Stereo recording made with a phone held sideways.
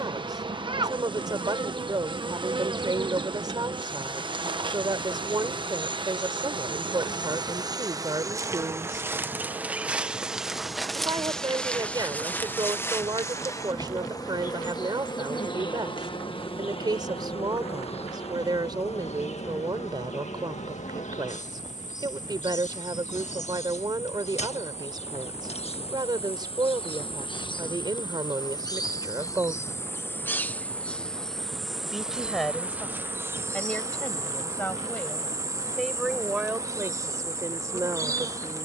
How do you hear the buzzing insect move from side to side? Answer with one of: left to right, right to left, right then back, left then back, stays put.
left then back.